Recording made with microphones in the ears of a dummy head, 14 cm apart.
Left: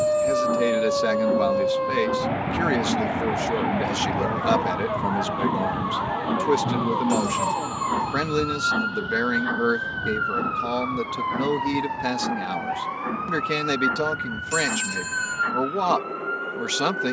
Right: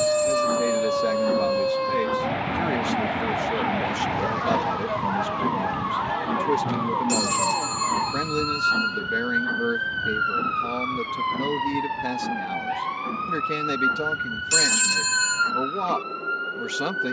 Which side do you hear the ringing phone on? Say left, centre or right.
right.